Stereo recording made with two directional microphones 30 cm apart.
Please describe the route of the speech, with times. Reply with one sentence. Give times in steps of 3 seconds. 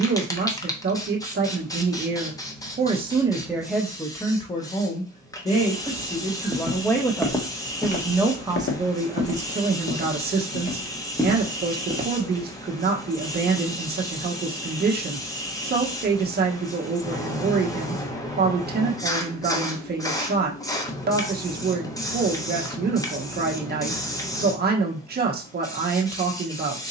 You can hear the speech on the right from 0 s, in the centre from 3 s and on the right from 9 s.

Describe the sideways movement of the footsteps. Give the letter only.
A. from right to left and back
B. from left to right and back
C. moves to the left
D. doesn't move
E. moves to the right
A.